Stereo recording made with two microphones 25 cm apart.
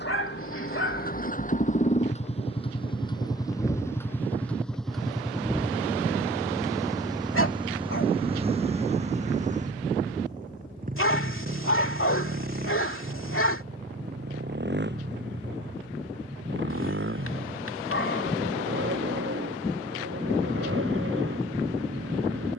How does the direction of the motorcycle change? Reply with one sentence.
In this clip you hear the motorcycle move from left to right.